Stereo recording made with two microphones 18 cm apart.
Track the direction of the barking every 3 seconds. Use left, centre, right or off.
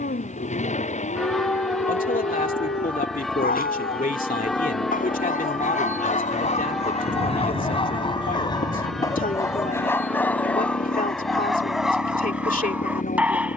left, left, left, centre, centre.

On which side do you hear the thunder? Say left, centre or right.
right.